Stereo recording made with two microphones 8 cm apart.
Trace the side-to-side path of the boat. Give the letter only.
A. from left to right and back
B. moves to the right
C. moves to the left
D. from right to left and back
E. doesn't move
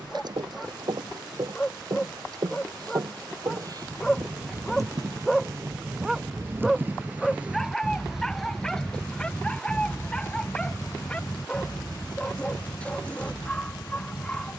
C.